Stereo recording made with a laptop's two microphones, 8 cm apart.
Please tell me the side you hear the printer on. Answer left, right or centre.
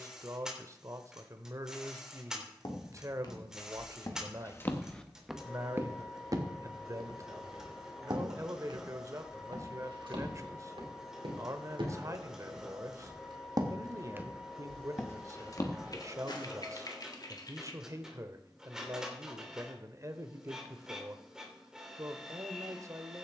centre.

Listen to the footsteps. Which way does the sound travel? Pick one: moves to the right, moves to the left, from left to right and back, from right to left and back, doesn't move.
from left to right and back.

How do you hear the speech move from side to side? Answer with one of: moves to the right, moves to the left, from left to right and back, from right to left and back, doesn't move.
doesn't move.